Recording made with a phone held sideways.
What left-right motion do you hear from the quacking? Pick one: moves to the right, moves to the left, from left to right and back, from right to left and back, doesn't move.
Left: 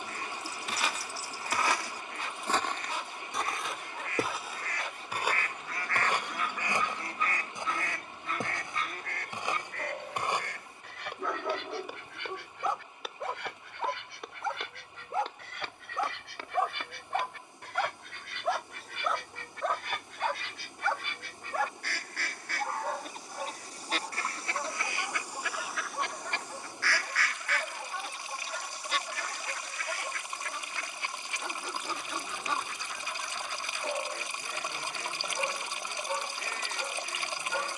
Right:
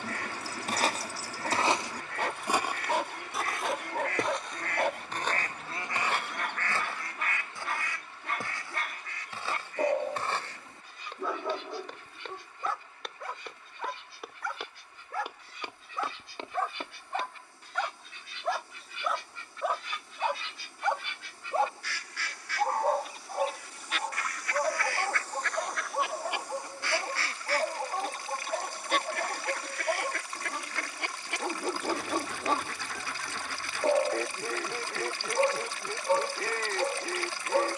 from right to left and back.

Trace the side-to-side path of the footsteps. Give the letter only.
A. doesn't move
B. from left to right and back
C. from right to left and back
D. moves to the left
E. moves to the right
C.